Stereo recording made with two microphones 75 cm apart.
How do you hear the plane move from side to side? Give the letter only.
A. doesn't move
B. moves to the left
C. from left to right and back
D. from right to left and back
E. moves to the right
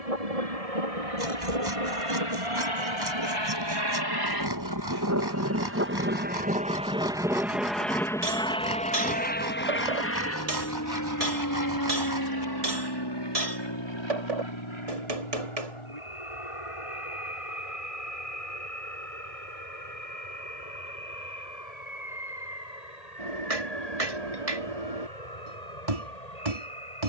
B.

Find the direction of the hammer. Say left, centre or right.
right.